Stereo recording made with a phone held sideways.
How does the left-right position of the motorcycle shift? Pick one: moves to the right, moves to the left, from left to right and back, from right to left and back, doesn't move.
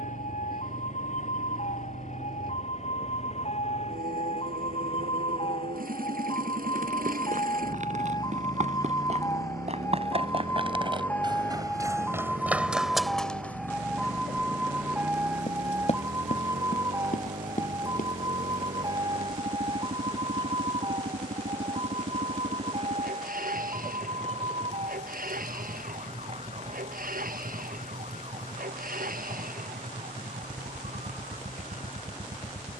doesn't move.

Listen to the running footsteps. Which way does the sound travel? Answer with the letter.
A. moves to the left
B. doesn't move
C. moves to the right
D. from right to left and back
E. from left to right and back
A.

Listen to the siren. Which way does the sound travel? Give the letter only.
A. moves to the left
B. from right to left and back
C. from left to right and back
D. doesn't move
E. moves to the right
E.